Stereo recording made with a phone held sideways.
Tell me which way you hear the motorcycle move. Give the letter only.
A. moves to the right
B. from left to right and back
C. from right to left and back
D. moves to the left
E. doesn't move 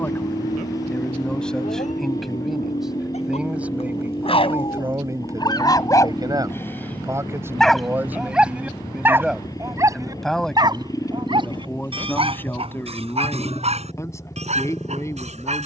E.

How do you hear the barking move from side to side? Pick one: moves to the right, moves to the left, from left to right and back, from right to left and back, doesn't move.
moves to the right.